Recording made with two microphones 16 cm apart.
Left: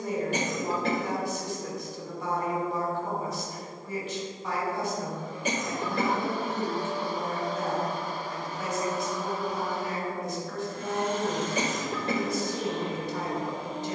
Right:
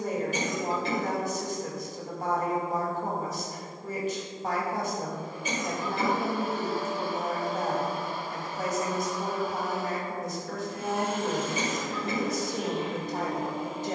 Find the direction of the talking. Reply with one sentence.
You can hear the talking on the right.